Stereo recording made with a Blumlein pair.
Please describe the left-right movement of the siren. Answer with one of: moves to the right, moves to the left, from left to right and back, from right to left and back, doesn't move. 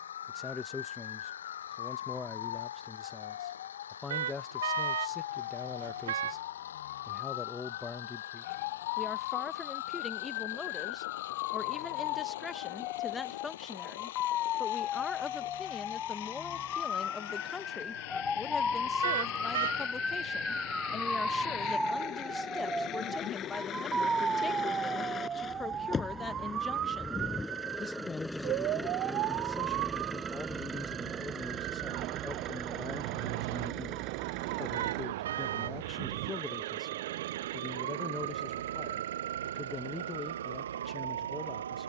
moves to the right.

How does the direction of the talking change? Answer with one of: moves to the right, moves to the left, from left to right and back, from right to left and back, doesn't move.
doesn't move.